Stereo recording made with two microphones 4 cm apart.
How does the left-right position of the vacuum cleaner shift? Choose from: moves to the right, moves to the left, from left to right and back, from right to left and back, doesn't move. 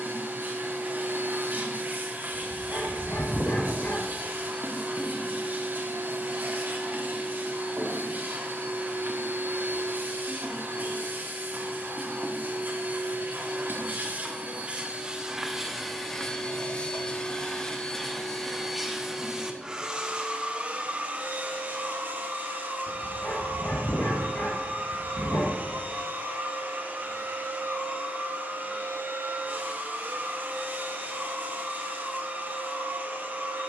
from right to left and back.